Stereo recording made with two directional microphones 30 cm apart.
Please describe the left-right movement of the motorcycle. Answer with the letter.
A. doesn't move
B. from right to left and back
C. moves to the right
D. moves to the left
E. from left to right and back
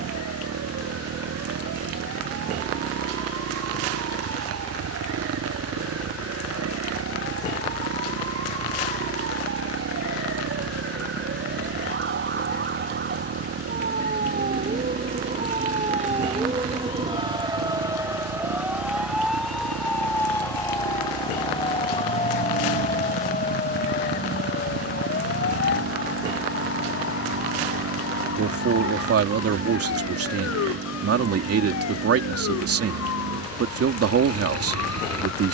A.